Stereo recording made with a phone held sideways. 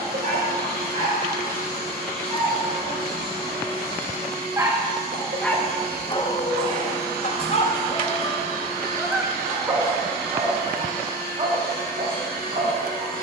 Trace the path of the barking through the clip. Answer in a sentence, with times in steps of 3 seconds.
In this clip you hear the barking on the right from 0 s, on the left from 6 s and on the right from 9 s.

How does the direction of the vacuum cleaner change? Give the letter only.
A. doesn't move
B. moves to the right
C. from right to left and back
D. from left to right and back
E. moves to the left
A.